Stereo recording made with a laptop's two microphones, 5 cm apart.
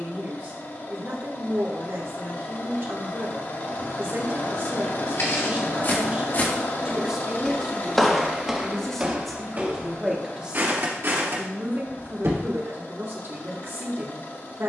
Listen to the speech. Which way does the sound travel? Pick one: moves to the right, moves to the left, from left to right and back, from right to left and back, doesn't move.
from right to left and back.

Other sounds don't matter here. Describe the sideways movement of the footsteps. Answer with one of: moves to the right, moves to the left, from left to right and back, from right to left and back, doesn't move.
moves to the right.